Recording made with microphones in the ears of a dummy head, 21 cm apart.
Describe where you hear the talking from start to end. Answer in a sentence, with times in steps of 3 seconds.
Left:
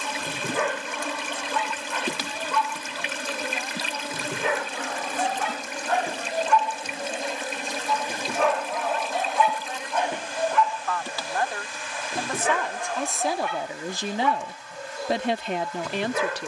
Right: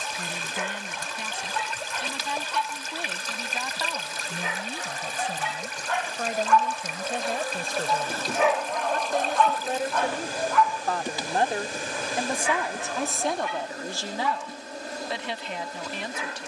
In this clip you hear the talking on the right from 0 s, in the centre from 12 s and on the left from 15 s.